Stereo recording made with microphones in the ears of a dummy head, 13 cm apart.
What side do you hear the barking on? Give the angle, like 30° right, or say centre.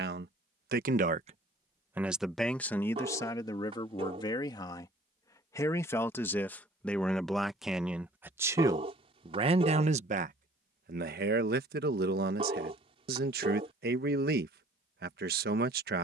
40° right.